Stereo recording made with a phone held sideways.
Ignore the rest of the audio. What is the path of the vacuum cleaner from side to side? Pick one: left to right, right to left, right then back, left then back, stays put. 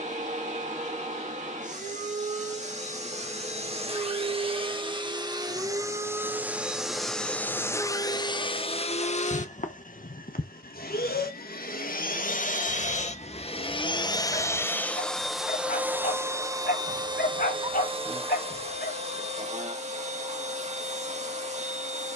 left then back.